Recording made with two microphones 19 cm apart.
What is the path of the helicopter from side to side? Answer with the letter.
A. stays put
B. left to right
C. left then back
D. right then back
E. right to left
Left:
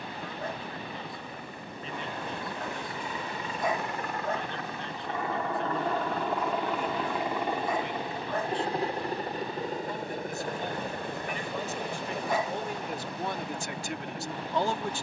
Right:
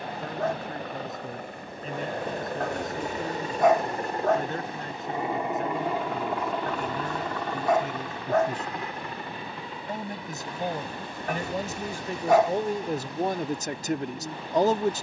E.